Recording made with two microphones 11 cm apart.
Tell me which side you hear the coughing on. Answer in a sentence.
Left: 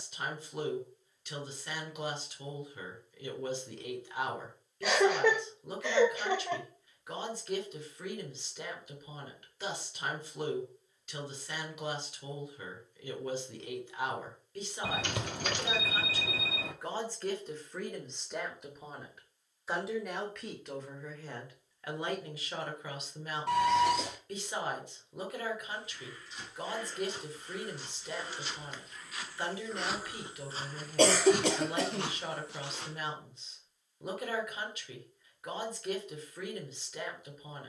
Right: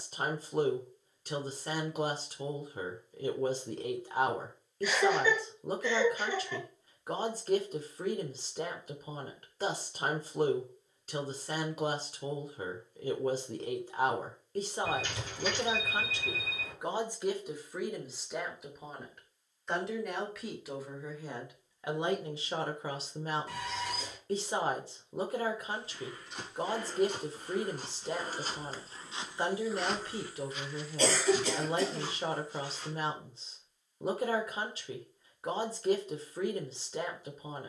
You can hear the coughing on the left.